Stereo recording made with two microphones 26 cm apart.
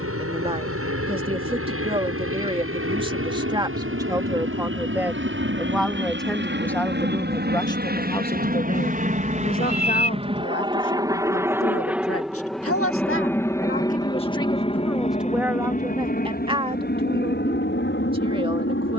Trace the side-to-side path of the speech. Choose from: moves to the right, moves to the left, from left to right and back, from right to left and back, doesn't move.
from right to left and back.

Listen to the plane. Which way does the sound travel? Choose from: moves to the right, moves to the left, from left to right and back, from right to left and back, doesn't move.
moves to the left.